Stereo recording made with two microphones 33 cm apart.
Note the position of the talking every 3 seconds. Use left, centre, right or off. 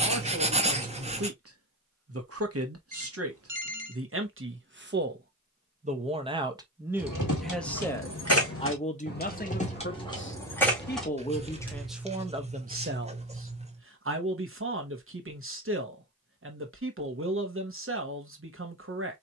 right, right, centre, left, right, right, right.